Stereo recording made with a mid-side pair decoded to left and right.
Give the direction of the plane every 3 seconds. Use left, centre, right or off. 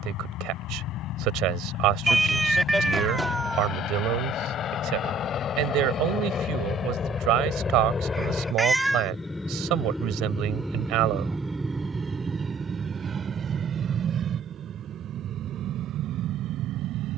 left, left, left, centre, right, right.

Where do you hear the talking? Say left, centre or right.
right.